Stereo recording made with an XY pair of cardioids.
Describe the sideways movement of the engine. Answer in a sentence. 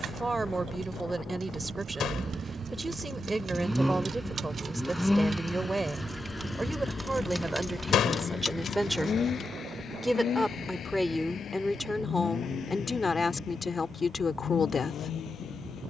In this clip you hear the engine move from right to left.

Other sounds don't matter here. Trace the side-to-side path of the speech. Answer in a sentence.
You can hear the speech go from the right side to the left.